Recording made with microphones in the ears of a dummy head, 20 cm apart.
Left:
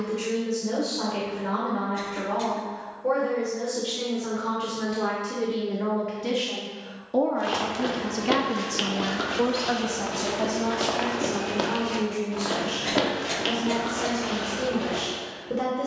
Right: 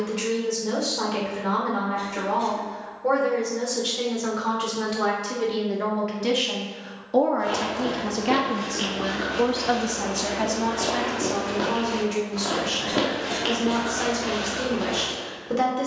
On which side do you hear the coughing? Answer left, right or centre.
left.